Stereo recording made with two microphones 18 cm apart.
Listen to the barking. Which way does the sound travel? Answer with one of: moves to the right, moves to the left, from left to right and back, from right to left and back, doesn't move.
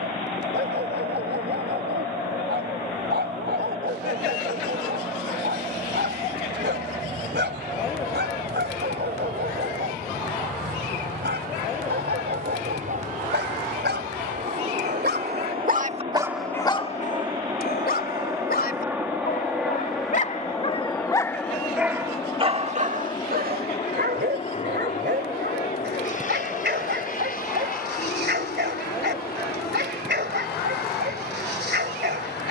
from right to left and back.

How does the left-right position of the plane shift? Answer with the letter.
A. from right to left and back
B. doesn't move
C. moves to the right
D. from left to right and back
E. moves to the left
E.